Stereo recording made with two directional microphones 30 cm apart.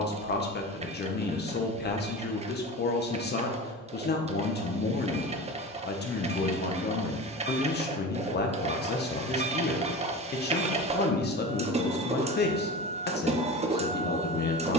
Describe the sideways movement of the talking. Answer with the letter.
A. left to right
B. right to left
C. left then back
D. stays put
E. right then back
D.